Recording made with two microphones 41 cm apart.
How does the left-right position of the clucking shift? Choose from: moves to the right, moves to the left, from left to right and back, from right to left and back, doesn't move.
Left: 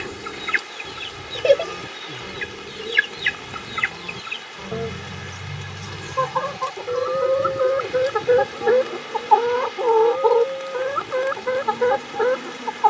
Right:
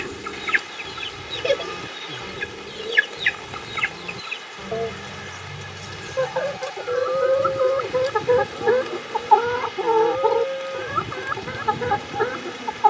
from right to left and back.